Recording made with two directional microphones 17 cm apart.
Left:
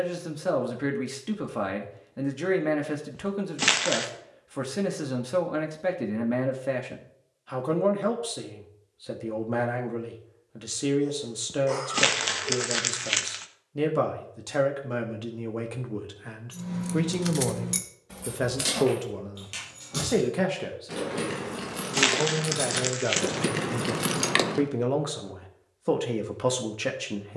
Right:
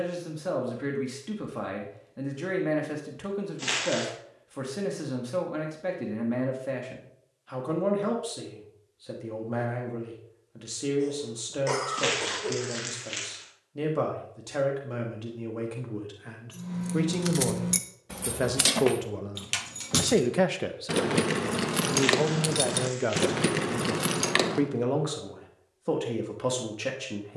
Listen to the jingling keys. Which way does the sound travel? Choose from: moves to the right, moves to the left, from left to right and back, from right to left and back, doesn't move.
from left to right and back.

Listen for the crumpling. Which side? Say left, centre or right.
left.